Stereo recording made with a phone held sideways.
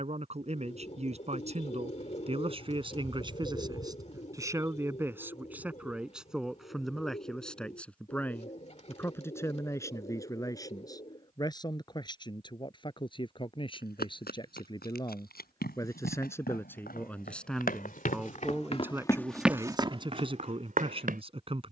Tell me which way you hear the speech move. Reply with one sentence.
You can hear the speech move from right to left and back again.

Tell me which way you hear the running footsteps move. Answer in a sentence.
You can hear the running footsteps travel towards the right.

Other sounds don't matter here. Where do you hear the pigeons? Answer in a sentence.
In this clip you hear the pigeons on the left.